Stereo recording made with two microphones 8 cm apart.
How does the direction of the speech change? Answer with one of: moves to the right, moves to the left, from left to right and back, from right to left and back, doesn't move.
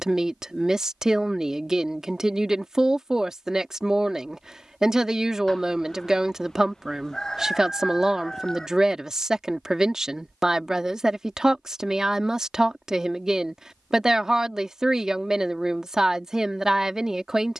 doesn't move.